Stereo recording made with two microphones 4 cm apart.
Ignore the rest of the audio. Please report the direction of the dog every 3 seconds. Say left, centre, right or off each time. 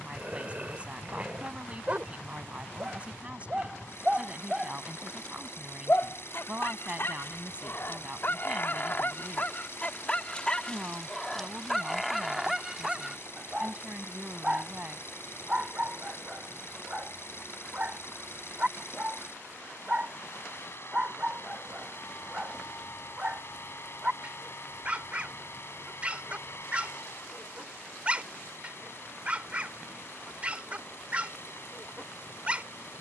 right, centre, left, left, centre, right, right, right, right, right, right.